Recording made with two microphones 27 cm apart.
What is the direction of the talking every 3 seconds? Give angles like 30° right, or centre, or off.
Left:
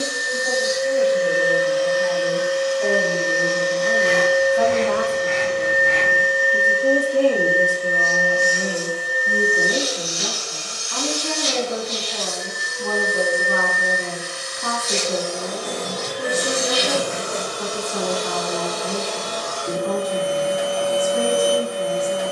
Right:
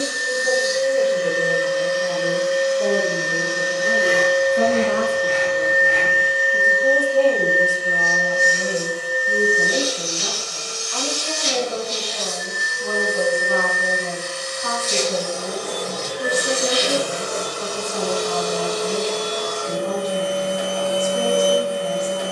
50° right, 30° right, 40° left, 60° left, 60° left, 60° left, 60° left, 60° left.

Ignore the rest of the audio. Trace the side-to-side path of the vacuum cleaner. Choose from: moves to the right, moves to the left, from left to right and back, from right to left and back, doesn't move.
from right to left and back.